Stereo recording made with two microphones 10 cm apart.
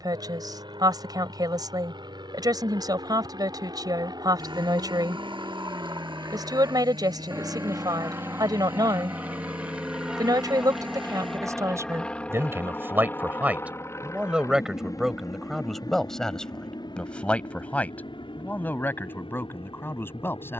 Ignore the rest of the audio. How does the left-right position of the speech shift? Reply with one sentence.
You can hear the speech go from the right side to the left.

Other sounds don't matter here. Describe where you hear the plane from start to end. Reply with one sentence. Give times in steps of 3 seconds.
In this clip you hear the plane on the right from 0 s, in the centre from 9 s and on the left from 12 s.